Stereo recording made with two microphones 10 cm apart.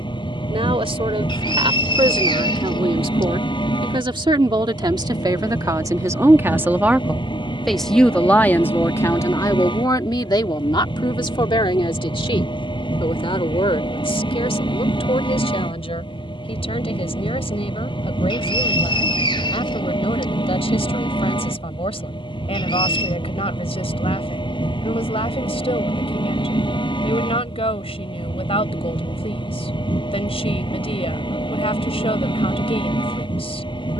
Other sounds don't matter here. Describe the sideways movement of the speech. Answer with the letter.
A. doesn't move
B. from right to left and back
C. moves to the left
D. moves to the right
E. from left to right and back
C.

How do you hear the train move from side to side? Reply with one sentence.
You can hear the train stay in one place.